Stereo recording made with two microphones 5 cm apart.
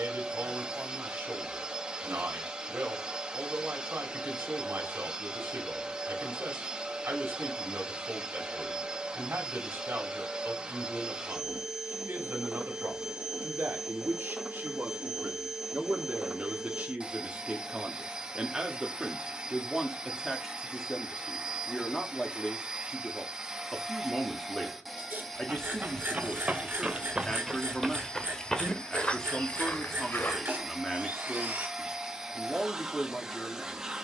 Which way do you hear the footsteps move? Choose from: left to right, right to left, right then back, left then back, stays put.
right to left.